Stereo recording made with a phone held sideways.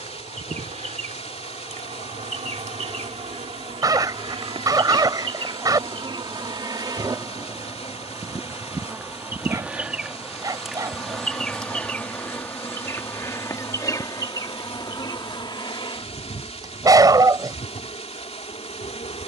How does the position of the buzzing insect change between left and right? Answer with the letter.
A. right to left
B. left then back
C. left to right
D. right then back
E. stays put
A.